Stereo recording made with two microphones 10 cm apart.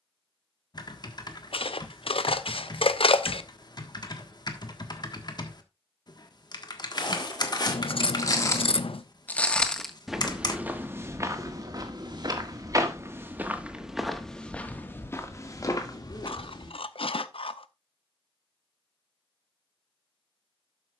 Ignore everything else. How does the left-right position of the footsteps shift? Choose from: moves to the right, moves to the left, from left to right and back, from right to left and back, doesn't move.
from left to right and back.